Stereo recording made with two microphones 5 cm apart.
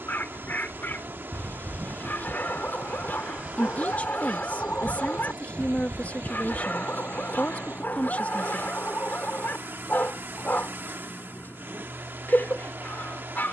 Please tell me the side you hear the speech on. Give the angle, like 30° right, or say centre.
30° left.